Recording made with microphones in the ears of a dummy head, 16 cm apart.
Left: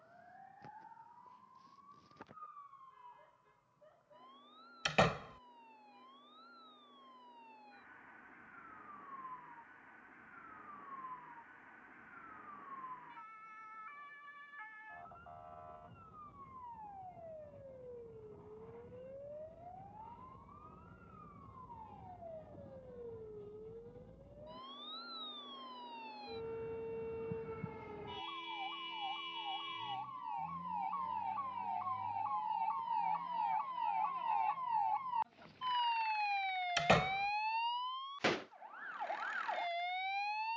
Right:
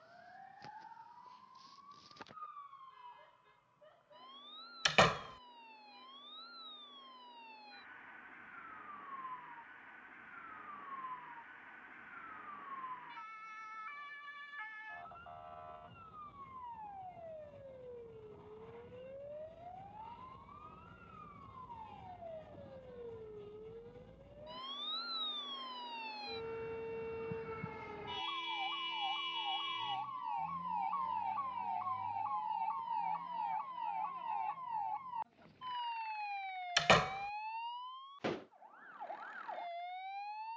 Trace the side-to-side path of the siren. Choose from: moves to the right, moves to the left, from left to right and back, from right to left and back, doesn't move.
moves to the left.